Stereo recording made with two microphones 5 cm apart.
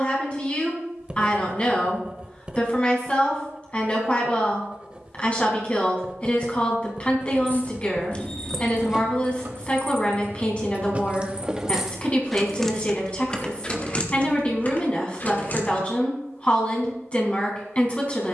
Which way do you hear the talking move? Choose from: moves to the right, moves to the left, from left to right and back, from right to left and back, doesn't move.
doesn't move.